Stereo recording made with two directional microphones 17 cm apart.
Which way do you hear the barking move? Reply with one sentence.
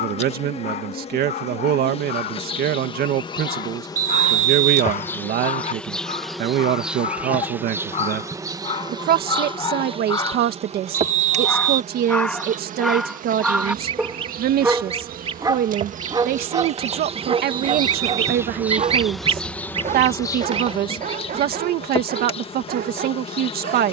In this clip you hear the barking move from left to right.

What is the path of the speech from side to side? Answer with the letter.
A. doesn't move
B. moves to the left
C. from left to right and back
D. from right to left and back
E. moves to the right
A.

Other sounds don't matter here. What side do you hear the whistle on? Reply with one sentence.
In this clip you hear the whistle on the right.